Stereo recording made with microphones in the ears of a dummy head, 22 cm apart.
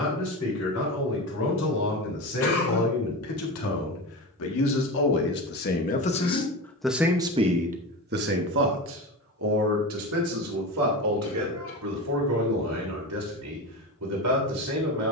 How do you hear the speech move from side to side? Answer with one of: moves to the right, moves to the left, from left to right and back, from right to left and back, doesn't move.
moves to the right.